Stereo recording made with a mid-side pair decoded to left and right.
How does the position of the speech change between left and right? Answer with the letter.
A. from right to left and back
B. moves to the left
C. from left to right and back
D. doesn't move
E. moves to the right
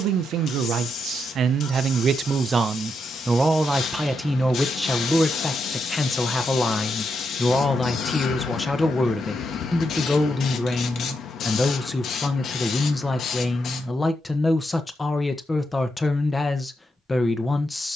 B.